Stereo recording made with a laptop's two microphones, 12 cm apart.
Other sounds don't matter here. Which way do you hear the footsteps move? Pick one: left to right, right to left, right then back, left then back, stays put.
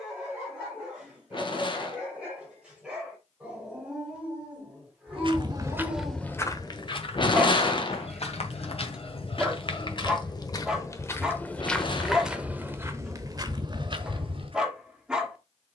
left then back.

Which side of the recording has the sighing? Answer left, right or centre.
left.